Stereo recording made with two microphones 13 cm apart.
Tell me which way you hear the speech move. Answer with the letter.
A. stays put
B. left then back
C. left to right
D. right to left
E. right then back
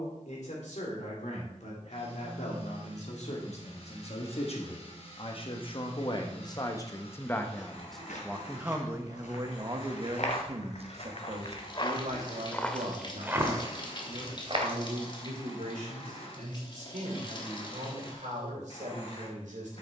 C.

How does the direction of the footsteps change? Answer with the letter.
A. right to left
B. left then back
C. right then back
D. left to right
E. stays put
D.